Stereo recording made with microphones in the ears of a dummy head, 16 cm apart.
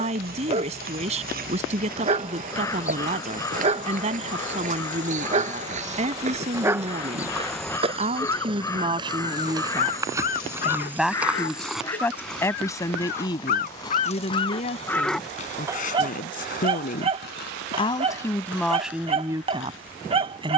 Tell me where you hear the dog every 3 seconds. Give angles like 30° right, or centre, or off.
30° right, 30° right, centre, 50° left, 40° left, 20° right, 30° right.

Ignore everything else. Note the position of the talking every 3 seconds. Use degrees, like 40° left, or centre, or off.
40° right, 40° right, 30° right, 10° right, 20° left, 40° left, 10° right.